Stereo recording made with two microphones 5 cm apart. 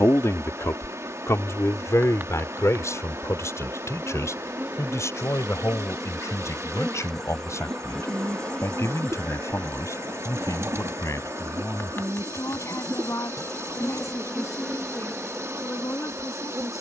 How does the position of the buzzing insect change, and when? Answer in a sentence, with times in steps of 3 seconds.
You can hear the buzzing insect on the right from 0 s, in the centre from 6 s, on the left from 9 s and on the right from 15 s.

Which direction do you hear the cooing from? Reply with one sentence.
You can hear the cooing on the right.